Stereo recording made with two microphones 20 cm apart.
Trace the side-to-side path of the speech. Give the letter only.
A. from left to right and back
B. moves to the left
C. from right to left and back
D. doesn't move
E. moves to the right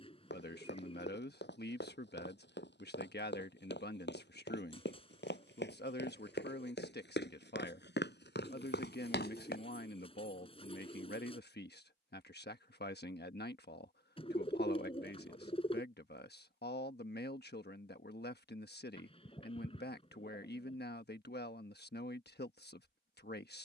D.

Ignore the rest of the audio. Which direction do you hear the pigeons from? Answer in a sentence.
You can hear the pigeons on the left.